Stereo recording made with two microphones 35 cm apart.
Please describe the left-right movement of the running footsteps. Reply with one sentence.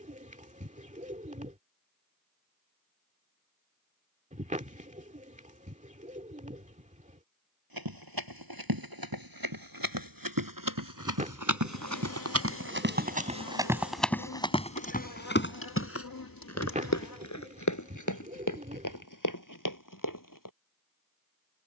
You can hear the running footsteps move to the left.